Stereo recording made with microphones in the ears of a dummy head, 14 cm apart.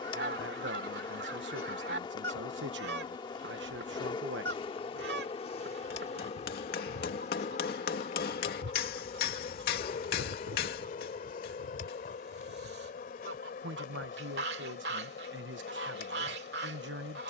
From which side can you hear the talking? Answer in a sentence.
You can hear the talking on the right.